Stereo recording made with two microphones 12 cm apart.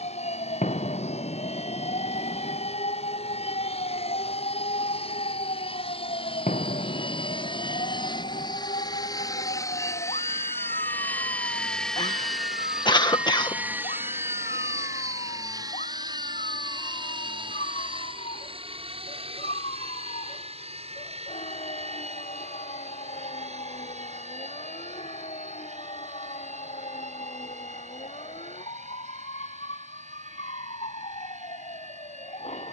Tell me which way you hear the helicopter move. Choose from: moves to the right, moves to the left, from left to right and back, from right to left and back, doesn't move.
moves to the right.